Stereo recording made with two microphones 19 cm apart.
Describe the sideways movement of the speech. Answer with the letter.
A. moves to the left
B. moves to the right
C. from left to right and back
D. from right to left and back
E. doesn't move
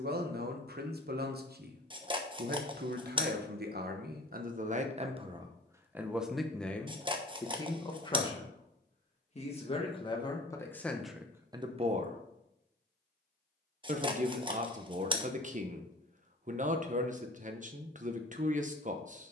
D.